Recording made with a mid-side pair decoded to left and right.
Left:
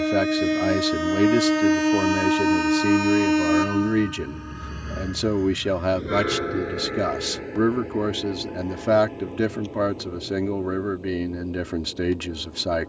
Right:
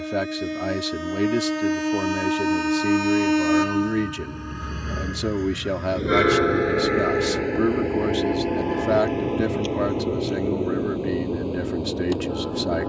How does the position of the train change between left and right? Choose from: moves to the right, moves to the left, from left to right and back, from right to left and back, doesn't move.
moves to the right.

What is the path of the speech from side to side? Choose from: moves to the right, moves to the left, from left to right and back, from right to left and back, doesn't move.
doesn't move.